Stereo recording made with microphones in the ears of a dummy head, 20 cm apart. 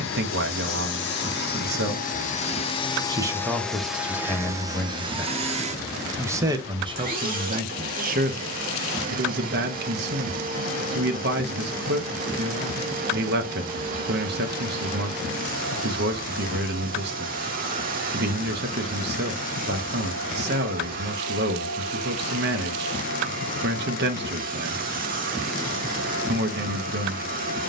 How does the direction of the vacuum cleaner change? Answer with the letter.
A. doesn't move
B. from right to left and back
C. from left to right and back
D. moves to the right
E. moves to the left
D.